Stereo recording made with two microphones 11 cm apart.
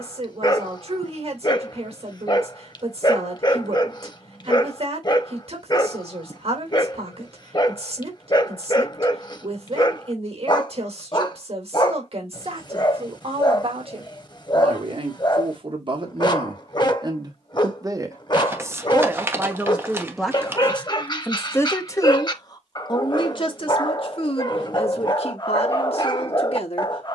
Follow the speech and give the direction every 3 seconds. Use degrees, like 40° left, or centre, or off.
60° right, 60° right, 60° right, 60° right, 60° right, 40° right, 10° right, 40° left, 60° left.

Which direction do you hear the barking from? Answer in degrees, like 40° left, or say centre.
40° left.